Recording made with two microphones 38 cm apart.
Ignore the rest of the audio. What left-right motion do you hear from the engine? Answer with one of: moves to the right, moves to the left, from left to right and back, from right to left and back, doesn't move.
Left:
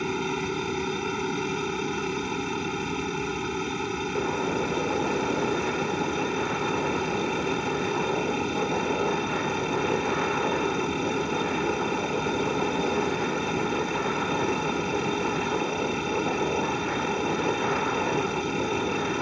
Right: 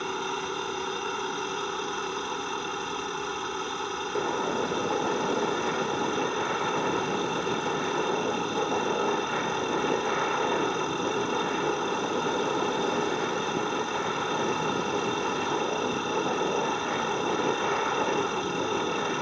doesn't move.